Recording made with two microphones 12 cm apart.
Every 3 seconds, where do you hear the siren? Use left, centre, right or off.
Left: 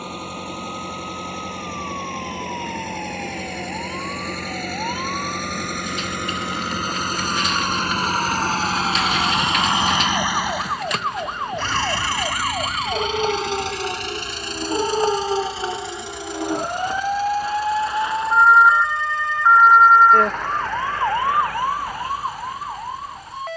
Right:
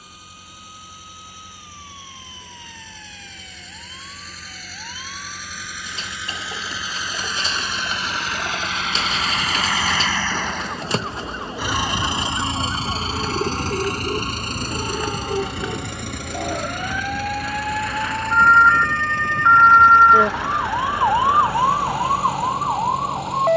left, left, left, left, left, left, centre, right.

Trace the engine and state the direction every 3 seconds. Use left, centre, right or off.
left, left, left, centre, right, right, right, right.